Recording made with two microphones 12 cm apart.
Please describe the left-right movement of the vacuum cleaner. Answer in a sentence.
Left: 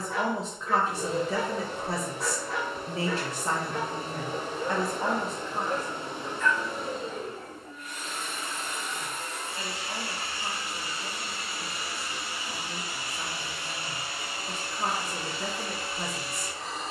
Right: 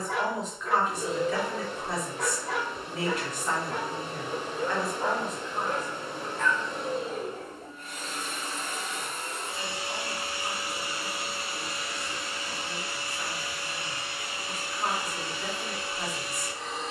In this clip you hear the vacuum cleaner go right and come back.